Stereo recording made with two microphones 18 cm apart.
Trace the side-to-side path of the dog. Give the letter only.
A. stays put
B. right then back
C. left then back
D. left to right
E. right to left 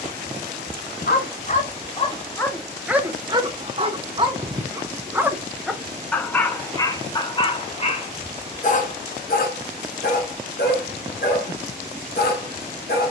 B.